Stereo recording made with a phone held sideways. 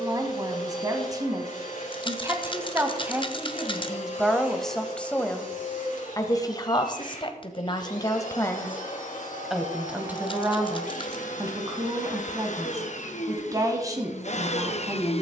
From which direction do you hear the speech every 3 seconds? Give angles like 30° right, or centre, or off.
20° right, centre, 30° left, 20° right, 20° right.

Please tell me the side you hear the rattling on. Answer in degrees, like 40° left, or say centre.
40° left.